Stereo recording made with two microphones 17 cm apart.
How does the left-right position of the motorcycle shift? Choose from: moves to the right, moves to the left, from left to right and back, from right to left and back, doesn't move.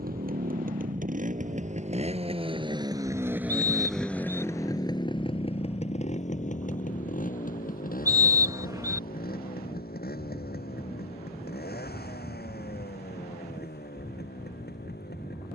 moves to the left.